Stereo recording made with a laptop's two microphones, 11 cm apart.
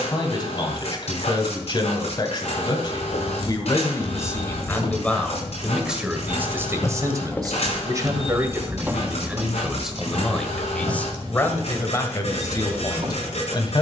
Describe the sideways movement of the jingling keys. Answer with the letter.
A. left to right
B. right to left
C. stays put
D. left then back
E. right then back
A.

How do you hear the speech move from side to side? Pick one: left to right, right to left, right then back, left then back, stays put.
right then back.